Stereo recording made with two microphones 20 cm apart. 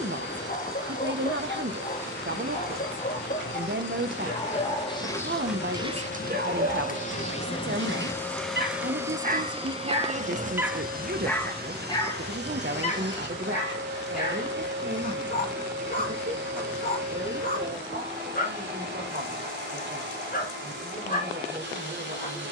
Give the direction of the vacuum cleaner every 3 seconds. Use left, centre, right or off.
left, left, left, right, right, right, right, right.